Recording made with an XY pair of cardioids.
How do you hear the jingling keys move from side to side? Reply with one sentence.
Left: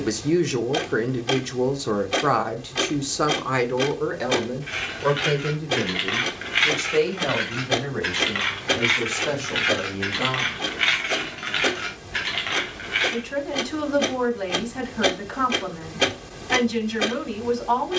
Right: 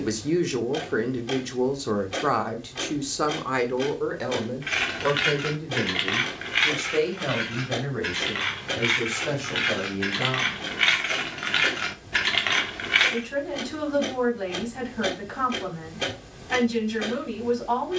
In this clip you hear the jingling keys move from right to left and back again.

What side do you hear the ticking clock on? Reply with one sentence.
In this clip you hear the ticking clock on the left.